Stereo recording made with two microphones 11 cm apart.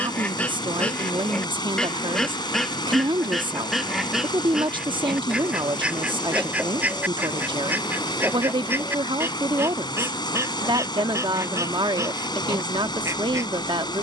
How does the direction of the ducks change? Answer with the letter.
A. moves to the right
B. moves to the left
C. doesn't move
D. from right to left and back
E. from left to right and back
A.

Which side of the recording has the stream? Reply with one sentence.
In this clip you hear the stream on the left.